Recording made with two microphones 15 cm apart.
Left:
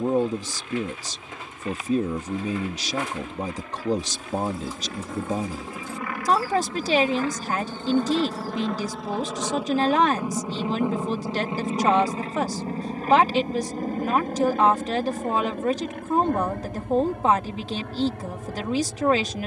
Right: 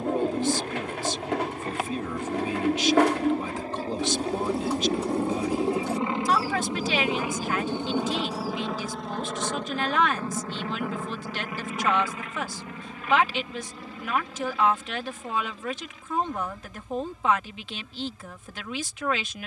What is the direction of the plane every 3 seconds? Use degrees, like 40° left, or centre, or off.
50° right, 30° right, 10° right, 20° left, 40° left, 60° left, 60° left.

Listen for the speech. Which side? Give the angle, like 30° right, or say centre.
40° left.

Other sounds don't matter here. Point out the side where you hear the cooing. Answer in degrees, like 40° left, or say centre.
70° right.